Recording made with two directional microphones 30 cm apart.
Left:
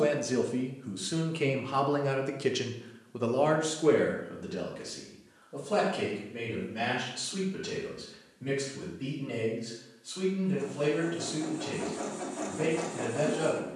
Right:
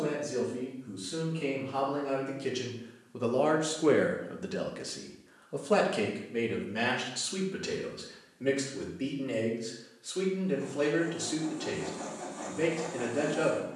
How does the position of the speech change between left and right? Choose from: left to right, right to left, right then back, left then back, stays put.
left to right.